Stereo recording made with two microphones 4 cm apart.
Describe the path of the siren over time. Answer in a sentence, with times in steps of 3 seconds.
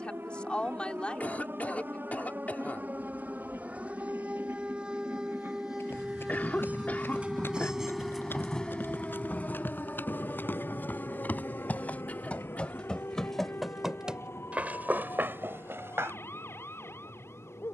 In this clip you hear the siren on the right from 0 s, in the centre from 6 s and on the left from 9 s.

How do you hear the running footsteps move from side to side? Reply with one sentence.
In this clip you hear the running footsteps travel towards the right.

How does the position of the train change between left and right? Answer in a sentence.
You can hear the train go from the right side to the left.